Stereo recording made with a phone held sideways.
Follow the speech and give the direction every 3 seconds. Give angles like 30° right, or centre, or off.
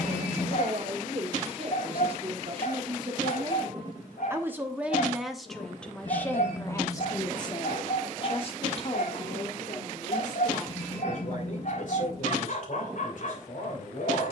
50° right, 10° right, 30° left, 50° left, 70° left.